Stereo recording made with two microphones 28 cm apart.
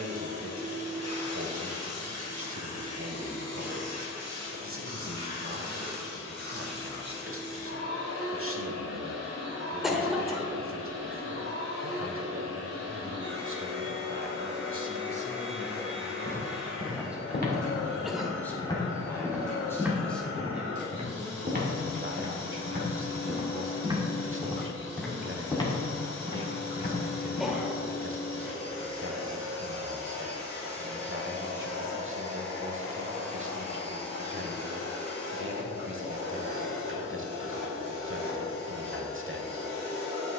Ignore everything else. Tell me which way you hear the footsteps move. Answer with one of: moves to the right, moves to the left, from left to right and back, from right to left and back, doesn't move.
from left to right and back.